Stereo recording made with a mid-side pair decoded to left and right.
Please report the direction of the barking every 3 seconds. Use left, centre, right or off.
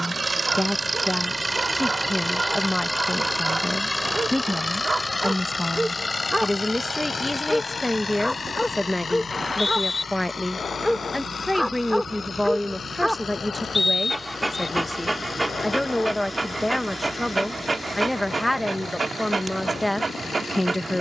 right, right, centre, centre, centre, right, right.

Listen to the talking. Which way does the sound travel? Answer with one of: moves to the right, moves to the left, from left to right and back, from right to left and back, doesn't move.
doesn't move.